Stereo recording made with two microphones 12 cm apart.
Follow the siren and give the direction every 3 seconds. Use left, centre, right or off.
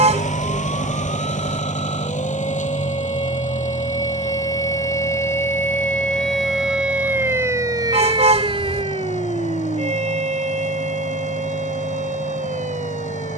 left, left, right, right, right.